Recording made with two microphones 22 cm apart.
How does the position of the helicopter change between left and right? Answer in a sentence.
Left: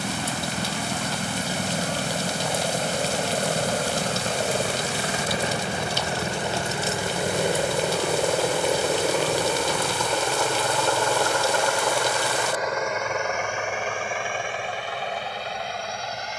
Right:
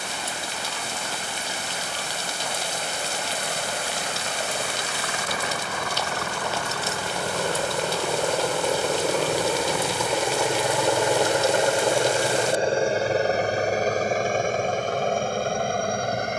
You can hear the helicopter travel towards the right.